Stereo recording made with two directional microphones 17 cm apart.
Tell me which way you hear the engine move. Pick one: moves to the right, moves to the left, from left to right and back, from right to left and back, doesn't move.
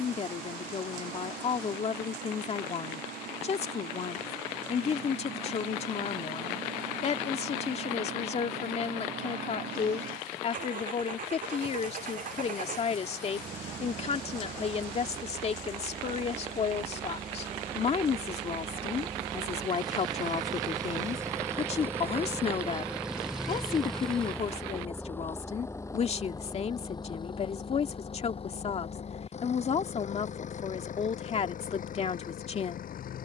moves to the left.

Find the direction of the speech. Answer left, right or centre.
left.